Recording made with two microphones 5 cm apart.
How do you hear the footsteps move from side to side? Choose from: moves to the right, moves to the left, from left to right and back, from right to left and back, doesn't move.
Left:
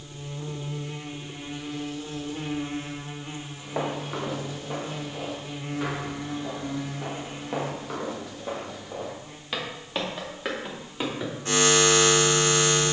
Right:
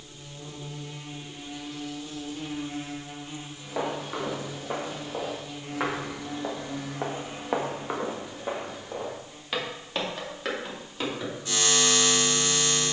from left to right and back.